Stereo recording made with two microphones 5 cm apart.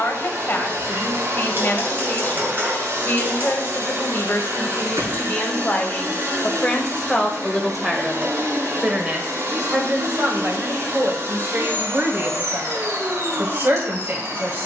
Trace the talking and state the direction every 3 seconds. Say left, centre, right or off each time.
left, left, centre, right, right.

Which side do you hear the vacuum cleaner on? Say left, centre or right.
right.